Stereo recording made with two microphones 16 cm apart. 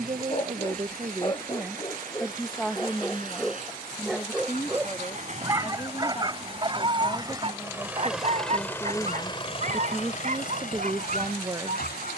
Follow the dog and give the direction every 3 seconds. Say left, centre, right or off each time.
left, centre, right, right.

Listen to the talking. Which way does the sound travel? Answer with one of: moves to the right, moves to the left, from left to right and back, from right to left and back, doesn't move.
from right to left and back.